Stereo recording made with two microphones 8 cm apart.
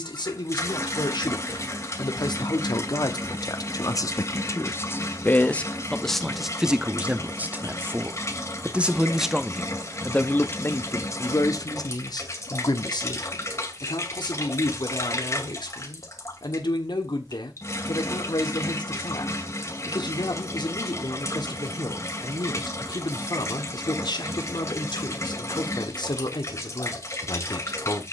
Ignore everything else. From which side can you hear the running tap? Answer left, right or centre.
left.